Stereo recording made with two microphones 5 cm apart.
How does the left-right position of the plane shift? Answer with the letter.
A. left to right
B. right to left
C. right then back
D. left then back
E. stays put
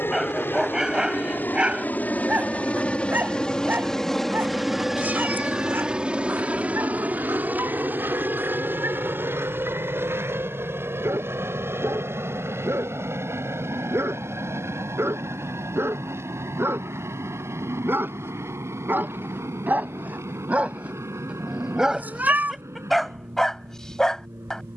A.